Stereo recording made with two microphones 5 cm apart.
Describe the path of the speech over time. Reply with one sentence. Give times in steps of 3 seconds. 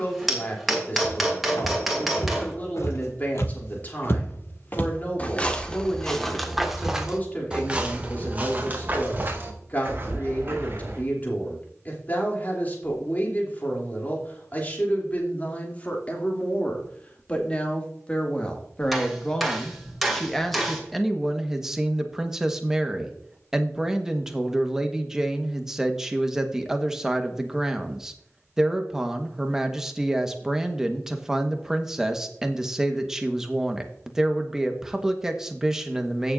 In this clip you hear the speech on the left from 0 s and in the centre from 18 s.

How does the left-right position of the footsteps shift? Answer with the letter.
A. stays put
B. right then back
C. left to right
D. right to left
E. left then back
C.